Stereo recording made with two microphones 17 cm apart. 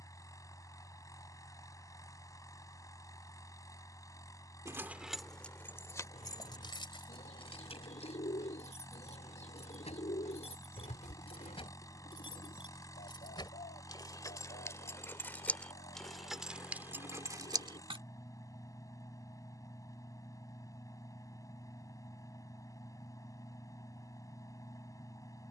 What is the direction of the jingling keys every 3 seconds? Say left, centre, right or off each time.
off, centre, left, left, left, centre, off, off, off.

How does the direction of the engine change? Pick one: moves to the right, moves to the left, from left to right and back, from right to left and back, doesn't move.
doesn't move.